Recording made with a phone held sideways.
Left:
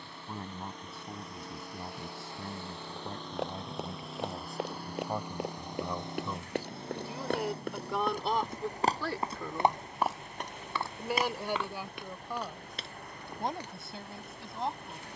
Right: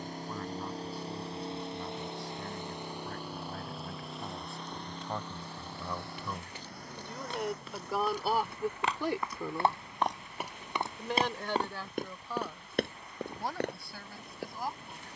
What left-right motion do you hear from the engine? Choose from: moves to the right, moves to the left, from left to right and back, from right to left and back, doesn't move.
moves to the left.